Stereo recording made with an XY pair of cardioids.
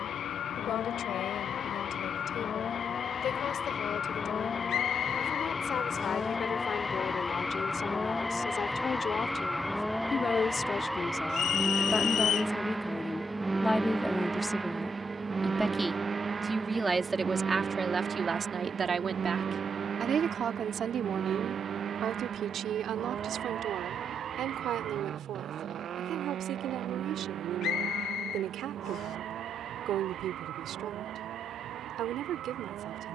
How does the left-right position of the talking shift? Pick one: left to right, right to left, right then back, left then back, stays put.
left to right.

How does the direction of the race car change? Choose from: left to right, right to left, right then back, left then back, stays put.
left to right.